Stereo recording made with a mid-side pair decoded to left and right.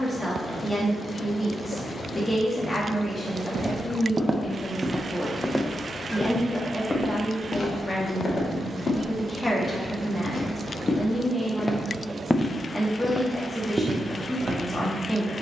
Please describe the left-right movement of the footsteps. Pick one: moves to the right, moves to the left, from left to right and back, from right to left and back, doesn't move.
from right to left and back.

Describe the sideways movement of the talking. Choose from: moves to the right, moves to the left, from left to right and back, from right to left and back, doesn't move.
doesn't move.